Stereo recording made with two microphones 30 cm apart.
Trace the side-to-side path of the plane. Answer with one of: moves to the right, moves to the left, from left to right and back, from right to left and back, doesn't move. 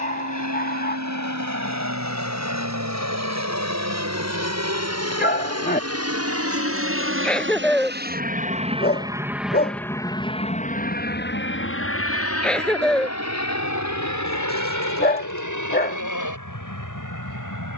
moves to the left.